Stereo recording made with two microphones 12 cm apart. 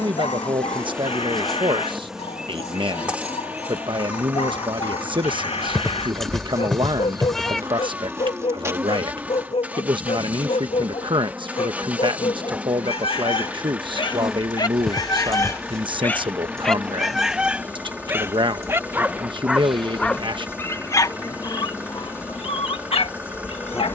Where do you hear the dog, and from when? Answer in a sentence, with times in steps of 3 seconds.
In this clip you hear the dog on the left from 0 s, in the centre from 15 s and on the left from 21 s.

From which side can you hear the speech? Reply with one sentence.
You can hear the speech on the right.